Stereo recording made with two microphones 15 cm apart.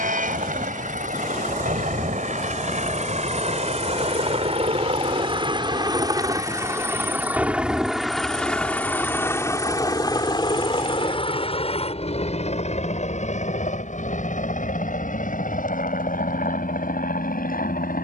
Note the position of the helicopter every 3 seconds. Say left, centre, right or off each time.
right, right, centre, left, left, left.